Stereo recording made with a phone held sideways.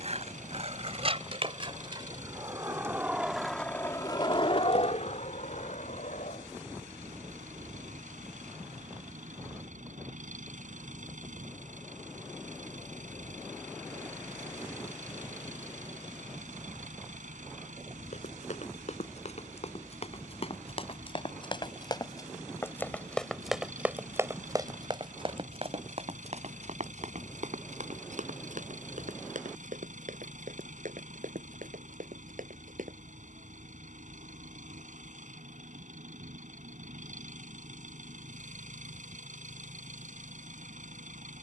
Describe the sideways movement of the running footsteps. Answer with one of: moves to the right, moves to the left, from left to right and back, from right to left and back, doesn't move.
moves to the right.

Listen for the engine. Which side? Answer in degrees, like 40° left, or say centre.
70° right.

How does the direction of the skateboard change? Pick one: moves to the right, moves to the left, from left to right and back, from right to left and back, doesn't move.
moves to the left.